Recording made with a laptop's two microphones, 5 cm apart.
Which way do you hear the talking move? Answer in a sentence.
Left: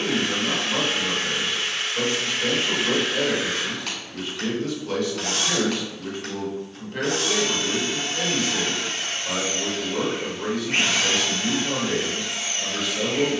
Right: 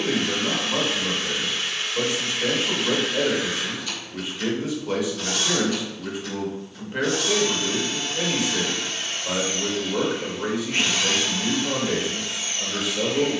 In this clip you hear the talking stay put.